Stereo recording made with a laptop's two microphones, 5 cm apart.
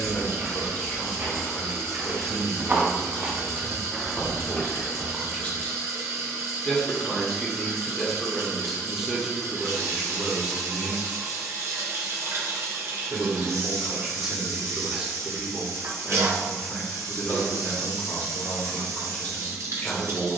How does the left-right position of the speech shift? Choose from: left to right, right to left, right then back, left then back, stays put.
right then back.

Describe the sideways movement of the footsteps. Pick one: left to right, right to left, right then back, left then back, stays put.
right to left.